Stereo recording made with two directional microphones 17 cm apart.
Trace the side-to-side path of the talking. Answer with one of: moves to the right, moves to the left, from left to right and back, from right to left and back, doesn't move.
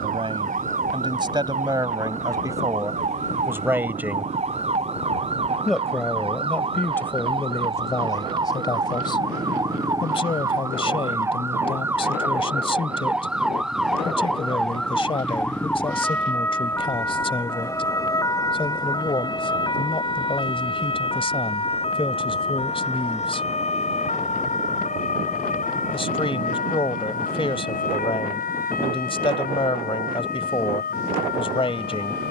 moves to the left.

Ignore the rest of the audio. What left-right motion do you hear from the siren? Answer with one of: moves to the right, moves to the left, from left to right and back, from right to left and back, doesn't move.
moves to the left.